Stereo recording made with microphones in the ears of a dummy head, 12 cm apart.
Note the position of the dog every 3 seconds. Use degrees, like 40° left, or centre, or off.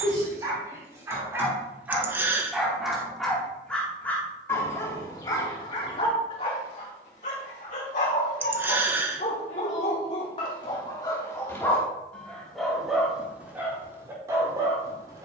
20° right, 20° left, 50° left, 40° left, 10° right.